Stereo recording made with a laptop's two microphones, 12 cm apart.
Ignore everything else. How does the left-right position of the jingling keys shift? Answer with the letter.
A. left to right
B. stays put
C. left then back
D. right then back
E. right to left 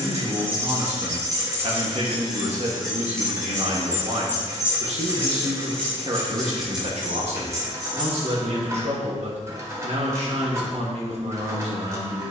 C.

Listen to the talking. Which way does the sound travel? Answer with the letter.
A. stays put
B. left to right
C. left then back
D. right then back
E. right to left
A.